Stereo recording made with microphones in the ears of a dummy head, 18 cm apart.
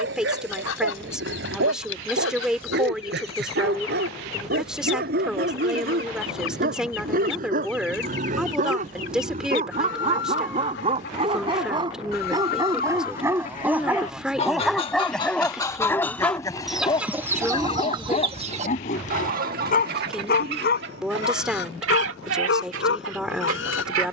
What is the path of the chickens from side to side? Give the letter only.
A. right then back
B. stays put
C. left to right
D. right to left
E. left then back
C.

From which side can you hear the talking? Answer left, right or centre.
centre.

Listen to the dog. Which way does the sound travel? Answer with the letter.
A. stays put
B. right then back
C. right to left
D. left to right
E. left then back
C.